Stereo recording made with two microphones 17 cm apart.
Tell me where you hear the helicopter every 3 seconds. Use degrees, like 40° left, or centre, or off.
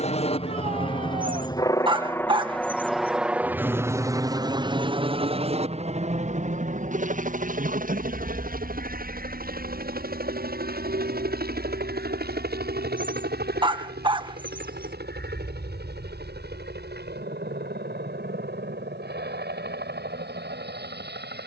20° left, 20° right, 50° right, 60° right, 70° right, 70° right, 80° right.